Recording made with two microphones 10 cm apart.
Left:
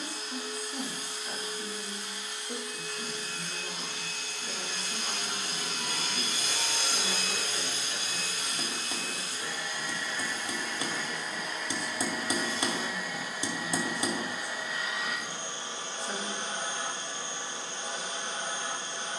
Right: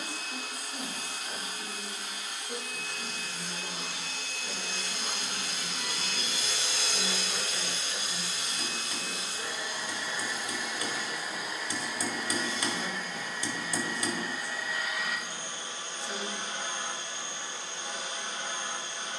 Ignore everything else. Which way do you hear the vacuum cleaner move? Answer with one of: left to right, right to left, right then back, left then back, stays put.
right to left.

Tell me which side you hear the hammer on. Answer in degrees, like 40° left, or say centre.
20° left.